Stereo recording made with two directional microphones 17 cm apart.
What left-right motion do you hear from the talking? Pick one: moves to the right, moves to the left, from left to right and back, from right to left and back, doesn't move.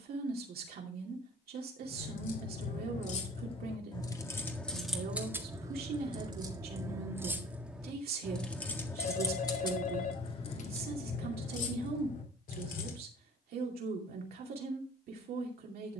doesn't move.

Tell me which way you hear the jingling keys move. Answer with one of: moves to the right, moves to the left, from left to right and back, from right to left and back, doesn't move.
from left to right and back.